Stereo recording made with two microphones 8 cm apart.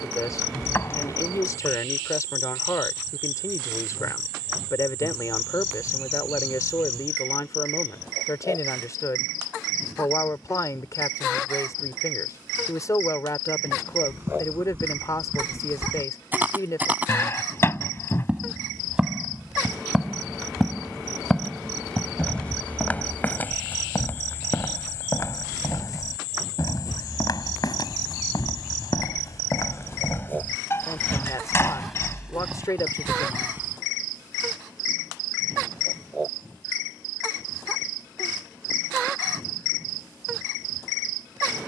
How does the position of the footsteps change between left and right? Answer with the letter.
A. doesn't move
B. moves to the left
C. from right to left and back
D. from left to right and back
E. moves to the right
C.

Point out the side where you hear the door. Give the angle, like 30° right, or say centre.
30° left.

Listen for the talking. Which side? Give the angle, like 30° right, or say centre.
40° left.